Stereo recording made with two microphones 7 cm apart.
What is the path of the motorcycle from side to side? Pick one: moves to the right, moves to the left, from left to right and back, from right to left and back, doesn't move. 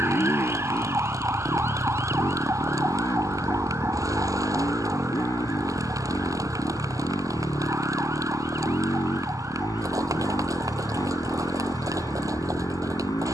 doesn't move.